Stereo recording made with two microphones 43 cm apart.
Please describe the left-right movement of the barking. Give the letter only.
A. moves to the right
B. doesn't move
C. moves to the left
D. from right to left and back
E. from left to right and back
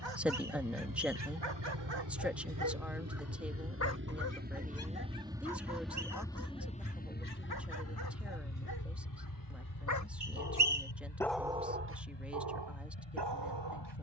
D.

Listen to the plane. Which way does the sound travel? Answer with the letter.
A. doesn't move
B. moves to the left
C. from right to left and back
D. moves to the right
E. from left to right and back
B.